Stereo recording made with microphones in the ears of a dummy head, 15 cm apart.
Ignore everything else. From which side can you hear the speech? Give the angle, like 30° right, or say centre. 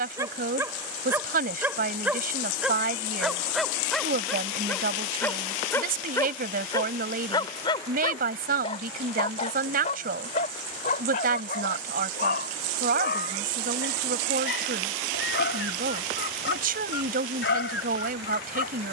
60° right.